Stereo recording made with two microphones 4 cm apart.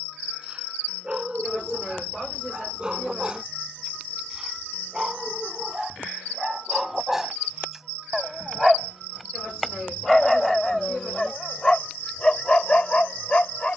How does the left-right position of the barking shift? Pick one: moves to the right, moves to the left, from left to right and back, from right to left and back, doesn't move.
moves to the left.